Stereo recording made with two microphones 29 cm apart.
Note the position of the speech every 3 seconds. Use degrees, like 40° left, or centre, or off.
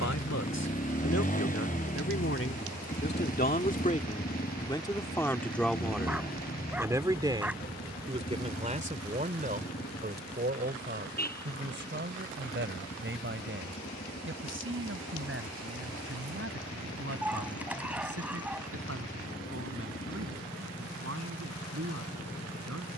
50° left, 20° left, 20° right, 30° right, 40° right, 50° right, 50° right, 50° right.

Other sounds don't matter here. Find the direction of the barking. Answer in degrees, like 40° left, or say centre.
centre.